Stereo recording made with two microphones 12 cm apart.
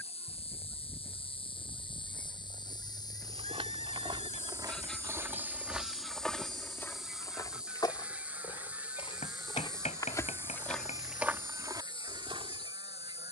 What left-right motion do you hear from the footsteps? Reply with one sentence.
In this clip you hear the footsteps move from right to left and back again.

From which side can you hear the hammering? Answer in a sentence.
In this clip you hear the hammering on the left.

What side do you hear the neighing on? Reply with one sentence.
In this clip you hear the neighing on the left.